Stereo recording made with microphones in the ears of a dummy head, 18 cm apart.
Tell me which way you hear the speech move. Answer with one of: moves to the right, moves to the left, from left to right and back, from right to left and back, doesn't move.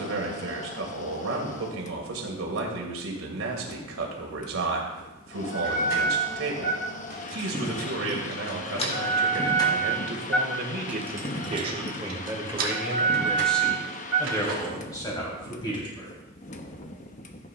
moves to the left.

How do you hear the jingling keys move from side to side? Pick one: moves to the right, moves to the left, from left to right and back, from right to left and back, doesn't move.
moves to the right.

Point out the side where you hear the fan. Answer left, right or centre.
left.